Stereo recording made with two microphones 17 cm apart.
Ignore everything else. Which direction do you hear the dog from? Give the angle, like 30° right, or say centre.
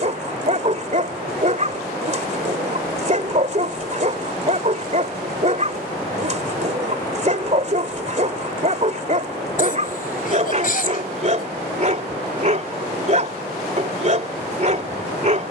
40° right.